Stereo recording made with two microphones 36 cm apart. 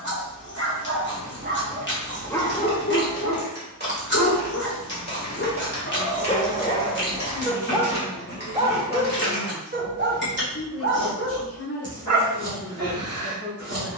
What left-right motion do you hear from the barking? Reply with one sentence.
You can hear the barking move from right to left and back again.